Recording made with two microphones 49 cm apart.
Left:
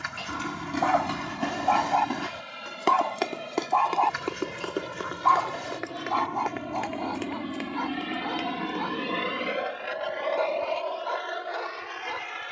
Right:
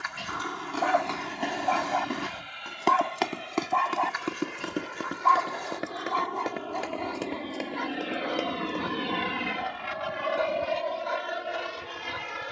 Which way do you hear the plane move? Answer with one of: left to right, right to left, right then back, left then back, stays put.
left to right.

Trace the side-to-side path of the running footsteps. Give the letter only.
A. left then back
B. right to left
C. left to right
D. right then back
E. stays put
C.